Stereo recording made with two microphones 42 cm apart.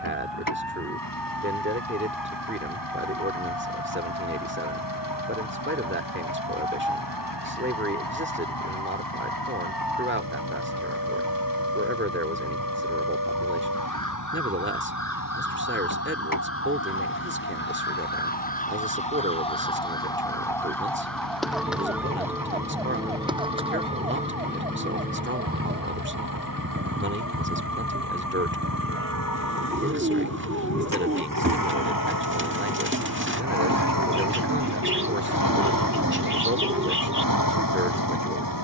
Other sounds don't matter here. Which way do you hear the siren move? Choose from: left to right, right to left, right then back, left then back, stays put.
left to right.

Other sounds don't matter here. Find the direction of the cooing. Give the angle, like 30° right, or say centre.
30° right.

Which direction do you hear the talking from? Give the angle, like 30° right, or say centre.
30° right.